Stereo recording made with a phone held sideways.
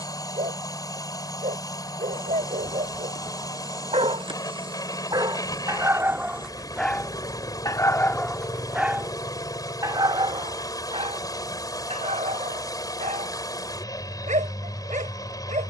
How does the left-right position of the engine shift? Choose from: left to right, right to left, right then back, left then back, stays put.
stays put.